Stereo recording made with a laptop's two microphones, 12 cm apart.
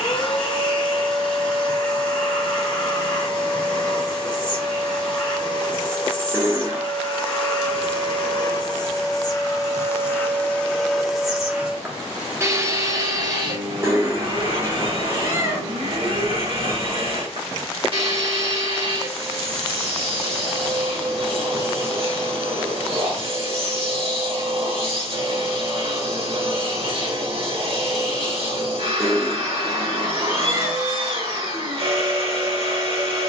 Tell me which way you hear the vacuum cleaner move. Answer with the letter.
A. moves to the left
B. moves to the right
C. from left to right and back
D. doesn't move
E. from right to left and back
B.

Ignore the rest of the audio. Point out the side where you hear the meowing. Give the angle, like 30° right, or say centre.
20° right.